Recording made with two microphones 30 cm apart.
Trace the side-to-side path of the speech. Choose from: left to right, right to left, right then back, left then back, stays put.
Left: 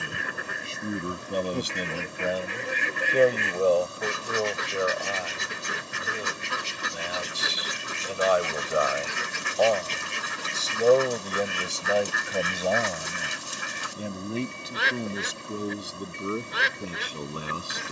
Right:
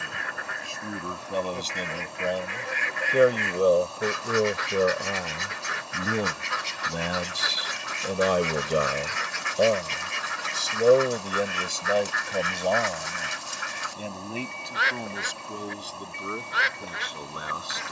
right then back.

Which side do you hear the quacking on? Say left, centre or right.
left.